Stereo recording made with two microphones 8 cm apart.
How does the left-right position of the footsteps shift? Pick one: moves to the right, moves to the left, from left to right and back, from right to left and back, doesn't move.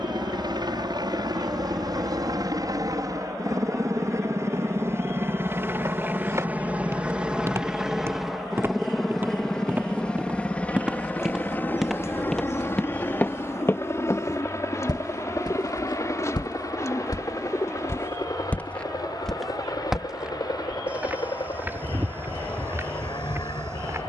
from right to left and back.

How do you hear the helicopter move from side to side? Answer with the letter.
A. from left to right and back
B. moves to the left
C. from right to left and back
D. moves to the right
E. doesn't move
B.